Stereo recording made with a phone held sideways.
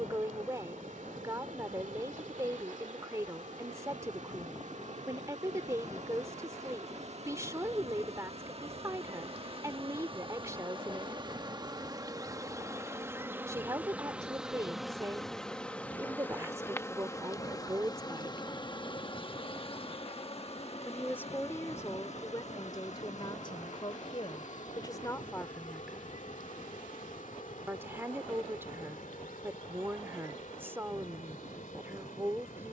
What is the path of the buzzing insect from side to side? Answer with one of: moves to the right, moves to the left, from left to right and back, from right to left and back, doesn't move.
moves to the left.